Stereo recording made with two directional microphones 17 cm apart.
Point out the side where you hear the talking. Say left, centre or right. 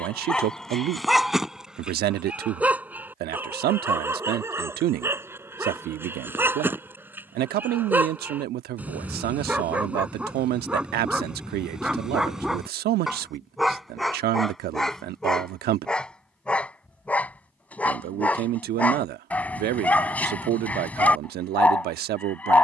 right.